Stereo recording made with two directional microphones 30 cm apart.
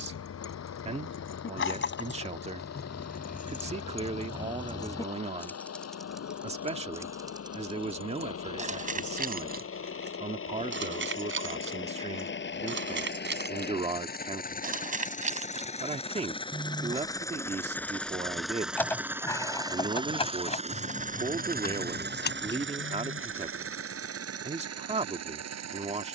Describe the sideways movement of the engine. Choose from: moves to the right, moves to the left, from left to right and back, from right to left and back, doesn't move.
moves to the right.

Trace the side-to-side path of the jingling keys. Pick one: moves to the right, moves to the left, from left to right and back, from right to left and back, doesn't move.
from left to right and back.